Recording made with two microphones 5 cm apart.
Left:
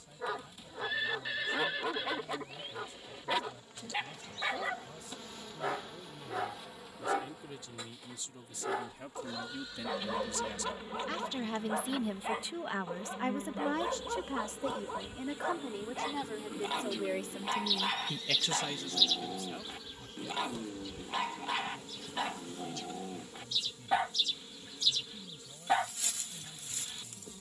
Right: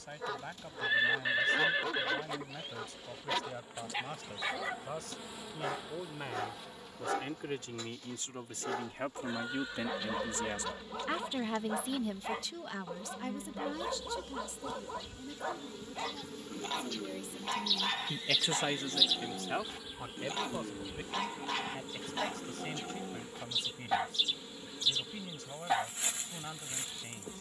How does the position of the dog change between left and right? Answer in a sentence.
In this clip you hear the dog stay in one place.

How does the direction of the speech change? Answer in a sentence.
In this clip you hear the speech go left and come back.